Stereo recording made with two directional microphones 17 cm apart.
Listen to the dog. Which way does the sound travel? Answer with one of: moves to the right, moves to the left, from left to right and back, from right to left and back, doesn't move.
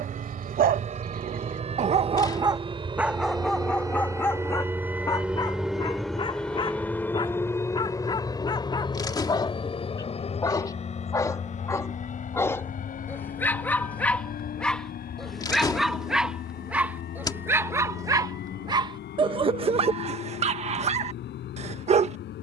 from right to left and back.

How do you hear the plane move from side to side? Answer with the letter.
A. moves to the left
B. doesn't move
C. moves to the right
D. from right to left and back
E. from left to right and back
A.